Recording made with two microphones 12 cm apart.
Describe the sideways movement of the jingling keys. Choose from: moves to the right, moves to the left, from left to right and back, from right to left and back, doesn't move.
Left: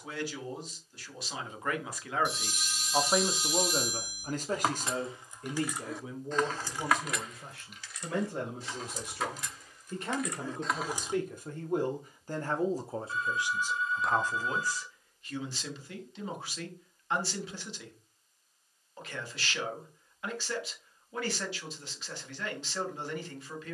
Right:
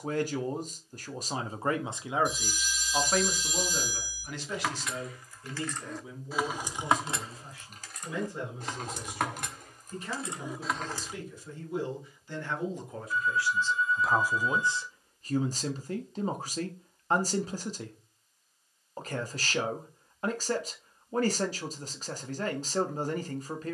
from left to right and back.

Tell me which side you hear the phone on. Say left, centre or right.
left.